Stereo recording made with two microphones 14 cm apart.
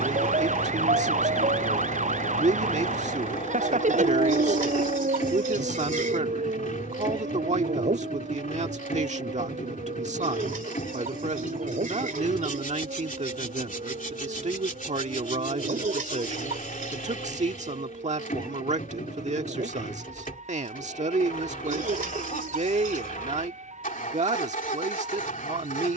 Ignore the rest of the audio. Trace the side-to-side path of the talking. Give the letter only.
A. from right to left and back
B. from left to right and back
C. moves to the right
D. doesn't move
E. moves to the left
D.